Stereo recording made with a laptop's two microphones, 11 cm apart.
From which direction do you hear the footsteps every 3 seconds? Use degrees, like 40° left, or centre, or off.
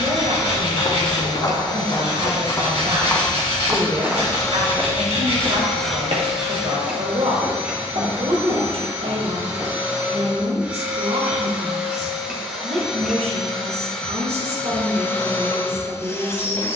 40° left, 20° right, 70° right, 80° right, off, off.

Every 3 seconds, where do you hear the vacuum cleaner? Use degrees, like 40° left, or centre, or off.
40° left, 20° left, 10° right, 20° right, centre, 20° left.